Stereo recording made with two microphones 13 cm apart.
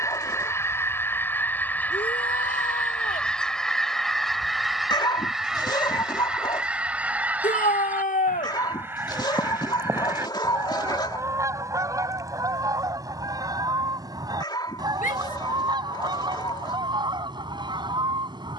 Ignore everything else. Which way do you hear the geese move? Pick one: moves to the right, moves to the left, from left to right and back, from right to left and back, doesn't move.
moves to the right.